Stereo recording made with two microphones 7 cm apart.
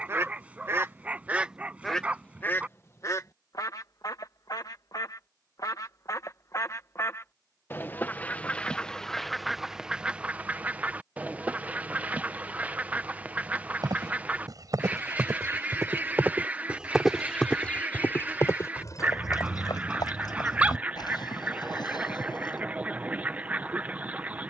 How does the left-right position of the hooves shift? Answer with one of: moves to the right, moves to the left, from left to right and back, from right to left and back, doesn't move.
moves to the left.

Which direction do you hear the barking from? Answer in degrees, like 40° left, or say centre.
20° right.